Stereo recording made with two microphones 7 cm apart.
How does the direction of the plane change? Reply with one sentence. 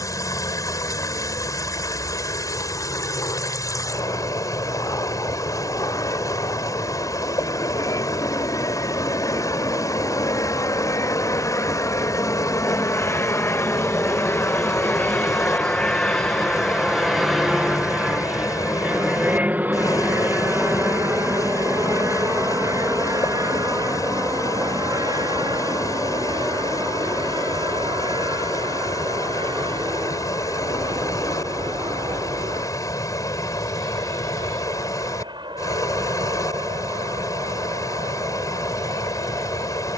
You can hear the plane go from the left side to the right.